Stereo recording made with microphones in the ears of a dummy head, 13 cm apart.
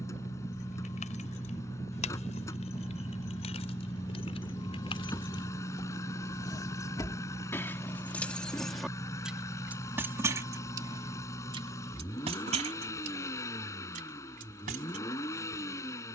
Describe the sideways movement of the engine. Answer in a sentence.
In this clip you hear the engine stay in one place.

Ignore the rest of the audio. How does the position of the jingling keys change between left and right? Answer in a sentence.
In this clip you hear the jingling keys move from left to right.